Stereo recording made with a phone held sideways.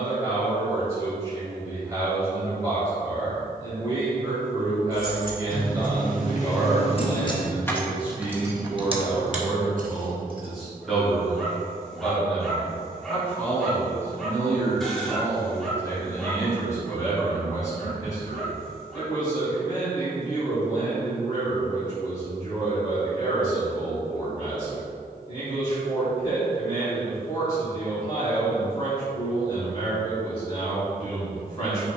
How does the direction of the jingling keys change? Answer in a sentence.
In this clip you hear the jingling keys move from left to right.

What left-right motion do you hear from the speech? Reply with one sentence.
You can hear the speech travel towards the left.